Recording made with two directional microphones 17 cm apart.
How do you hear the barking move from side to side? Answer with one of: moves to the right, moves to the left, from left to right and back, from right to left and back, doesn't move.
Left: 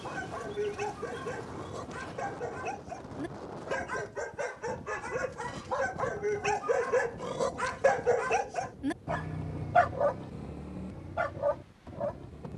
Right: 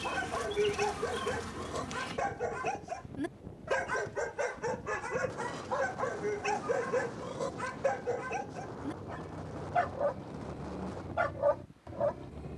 from right to left and back.